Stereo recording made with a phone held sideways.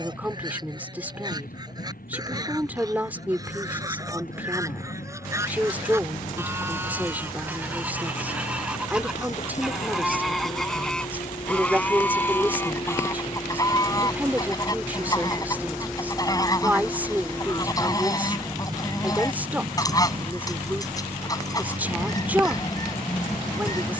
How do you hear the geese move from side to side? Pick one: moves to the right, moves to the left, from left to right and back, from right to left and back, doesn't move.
moves to the left.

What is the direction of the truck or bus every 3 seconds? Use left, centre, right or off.
left, left, left, left, left, centre, right, right.